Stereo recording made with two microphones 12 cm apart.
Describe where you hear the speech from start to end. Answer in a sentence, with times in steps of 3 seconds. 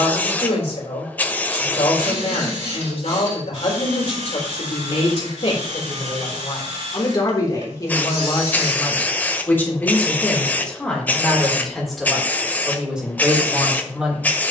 You can hear the speech on the left from 0 s and in the centre from 9 s.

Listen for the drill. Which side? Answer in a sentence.
In this clip you hear the drill on the right.